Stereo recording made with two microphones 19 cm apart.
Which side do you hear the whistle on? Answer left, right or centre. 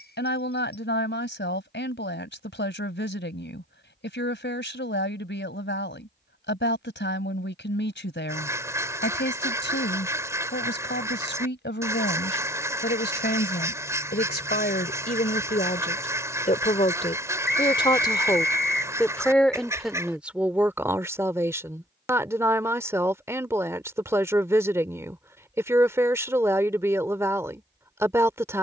left.